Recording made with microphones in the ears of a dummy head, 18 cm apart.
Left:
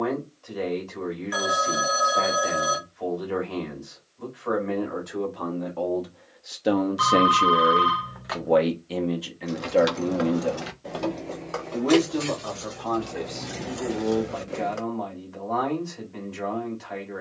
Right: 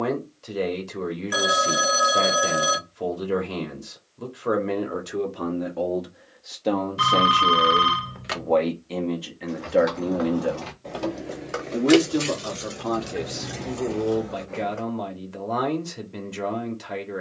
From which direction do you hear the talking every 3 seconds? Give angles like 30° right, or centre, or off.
50° right, 40° right, 20° left, 10° right, 40° right, 40° right.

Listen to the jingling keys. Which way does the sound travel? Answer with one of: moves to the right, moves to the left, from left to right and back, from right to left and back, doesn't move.
from left to right and back.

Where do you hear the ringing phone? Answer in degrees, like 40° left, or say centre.
30° right.